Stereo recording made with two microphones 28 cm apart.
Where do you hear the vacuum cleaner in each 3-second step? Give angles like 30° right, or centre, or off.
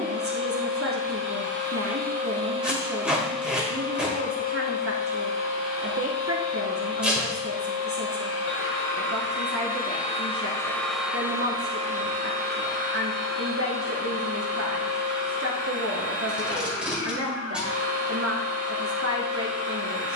40° right, 30° left, 60° left, 10° left, 40° right, 50° right, 50° right.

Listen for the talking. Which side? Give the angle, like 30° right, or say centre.
50° right.